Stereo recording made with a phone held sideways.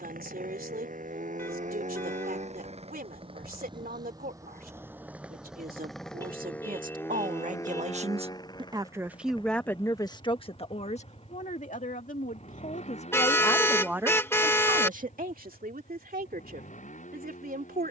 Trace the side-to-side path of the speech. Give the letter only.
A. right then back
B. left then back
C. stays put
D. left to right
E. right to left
B.